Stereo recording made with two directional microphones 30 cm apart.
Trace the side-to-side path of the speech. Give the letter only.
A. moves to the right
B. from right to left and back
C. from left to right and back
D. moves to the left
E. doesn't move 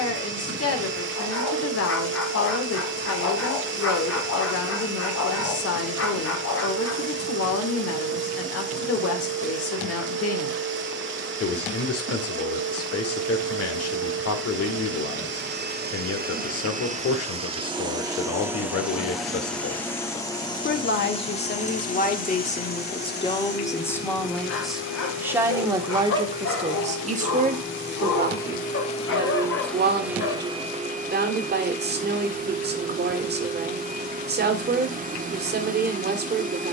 A.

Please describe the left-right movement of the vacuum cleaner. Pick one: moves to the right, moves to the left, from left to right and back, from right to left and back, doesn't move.
from right to left and back.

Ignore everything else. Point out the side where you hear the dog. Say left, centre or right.
left.